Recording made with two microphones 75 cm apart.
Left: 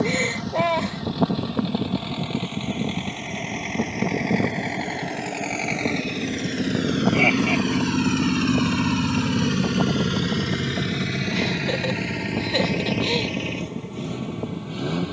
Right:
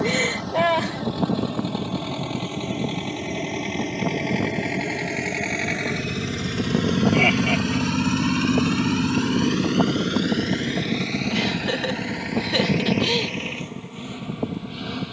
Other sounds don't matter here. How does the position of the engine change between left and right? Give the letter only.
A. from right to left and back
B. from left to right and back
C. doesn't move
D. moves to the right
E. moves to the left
E.